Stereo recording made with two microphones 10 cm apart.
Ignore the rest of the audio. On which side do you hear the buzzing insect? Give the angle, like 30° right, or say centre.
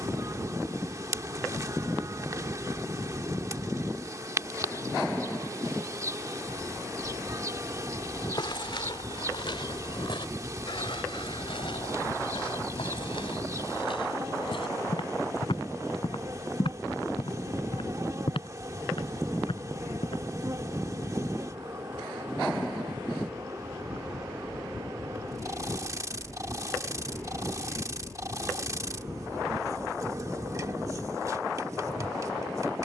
30° right.